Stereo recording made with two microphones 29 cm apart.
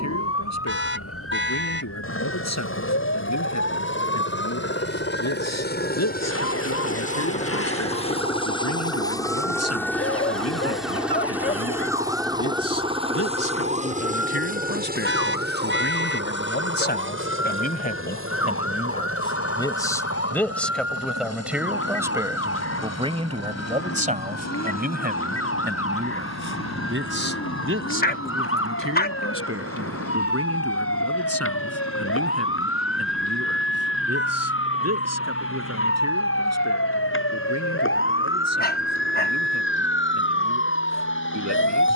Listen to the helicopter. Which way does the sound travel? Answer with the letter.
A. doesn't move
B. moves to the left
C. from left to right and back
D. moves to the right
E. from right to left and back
D.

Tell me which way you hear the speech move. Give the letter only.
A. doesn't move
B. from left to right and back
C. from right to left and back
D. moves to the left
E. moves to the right
E.